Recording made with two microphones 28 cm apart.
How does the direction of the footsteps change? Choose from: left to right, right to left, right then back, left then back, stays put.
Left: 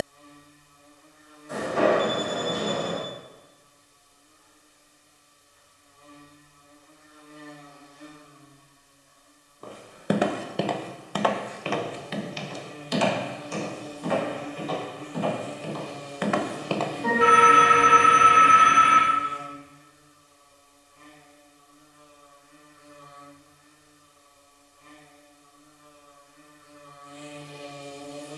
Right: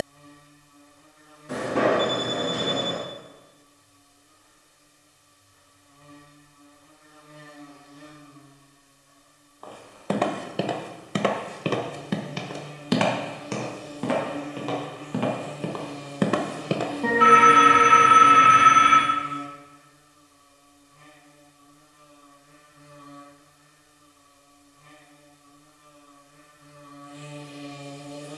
right then back.